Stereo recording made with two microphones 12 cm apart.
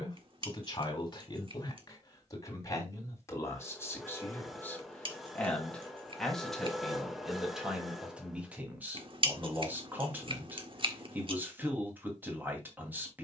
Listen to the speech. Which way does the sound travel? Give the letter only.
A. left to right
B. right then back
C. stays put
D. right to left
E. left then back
A.